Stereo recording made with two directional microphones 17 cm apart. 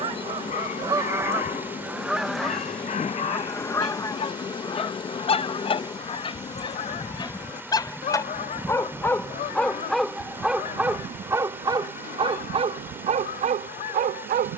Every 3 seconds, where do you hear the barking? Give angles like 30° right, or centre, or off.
50° left, 40° left, 20° left, 10° right, 40° right.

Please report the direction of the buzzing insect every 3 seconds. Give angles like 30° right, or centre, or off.
30° left, 30° left, 10° left, 30° right, 60° right.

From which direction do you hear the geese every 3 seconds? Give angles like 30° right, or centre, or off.
10° right, 20° left, 40° left, 50° left, 60° left.